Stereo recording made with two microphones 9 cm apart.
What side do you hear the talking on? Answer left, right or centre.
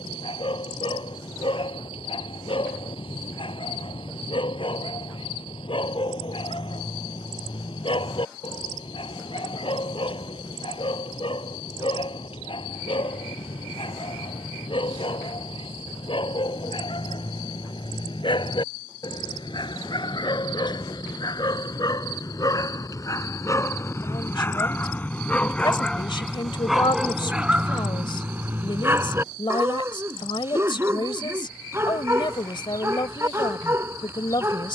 left.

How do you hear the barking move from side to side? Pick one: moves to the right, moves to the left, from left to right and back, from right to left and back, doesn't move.
moves to the right.